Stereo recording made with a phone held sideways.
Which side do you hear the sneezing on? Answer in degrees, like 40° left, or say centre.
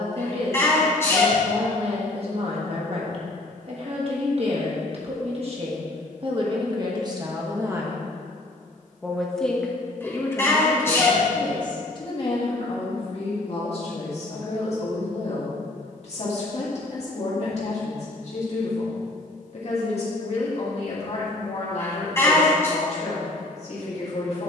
20° left.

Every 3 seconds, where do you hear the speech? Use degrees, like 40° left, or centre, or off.
50° right, 50° right, 30° right, 20° left, 40° left, 50° left, 50° left, 50° left.